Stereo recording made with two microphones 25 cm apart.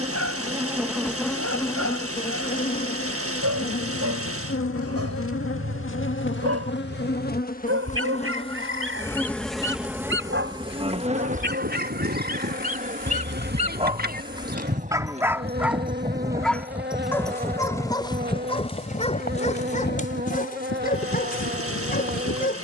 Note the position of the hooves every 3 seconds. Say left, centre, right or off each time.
off, off, off, right, right, centre, left, left.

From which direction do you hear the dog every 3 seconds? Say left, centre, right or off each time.
right, right, right, right, right, centre, left, left.